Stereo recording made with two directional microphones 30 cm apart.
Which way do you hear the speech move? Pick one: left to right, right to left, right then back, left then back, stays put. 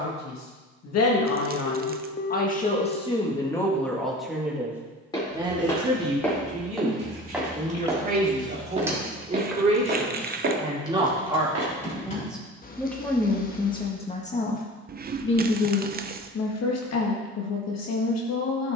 right then back.